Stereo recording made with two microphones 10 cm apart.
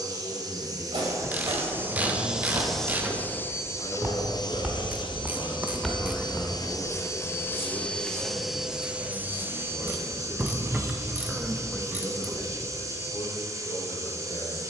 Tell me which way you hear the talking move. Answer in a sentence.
You can hear the talking go right and come back.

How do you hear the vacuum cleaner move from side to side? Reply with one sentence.
You can hear the vacuum cleaner move from right to left and back again.